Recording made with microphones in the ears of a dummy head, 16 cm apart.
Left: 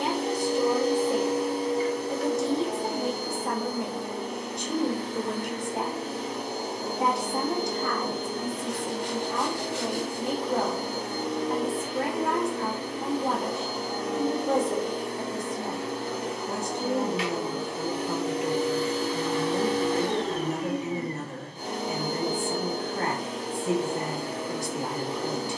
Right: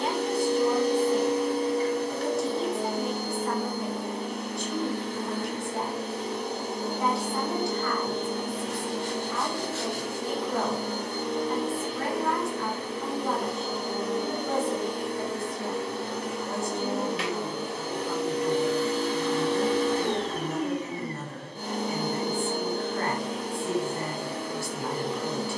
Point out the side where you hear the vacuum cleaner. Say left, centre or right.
right.